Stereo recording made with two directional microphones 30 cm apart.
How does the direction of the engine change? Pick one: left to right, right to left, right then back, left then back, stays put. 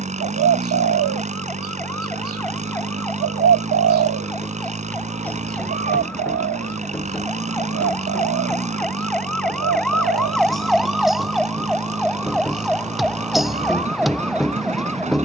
stays put.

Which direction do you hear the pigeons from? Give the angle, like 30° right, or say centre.
50° right.